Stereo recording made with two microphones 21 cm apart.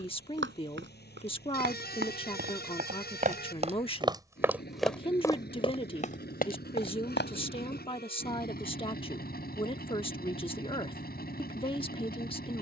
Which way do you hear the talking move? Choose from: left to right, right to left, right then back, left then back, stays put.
stays put.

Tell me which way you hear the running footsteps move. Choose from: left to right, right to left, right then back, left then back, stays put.
right to left.